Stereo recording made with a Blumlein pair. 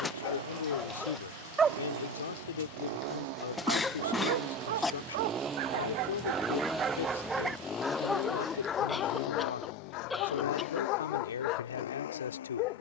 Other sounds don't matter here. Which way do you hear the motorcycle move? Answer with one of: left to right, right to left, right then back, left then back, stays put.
right to left.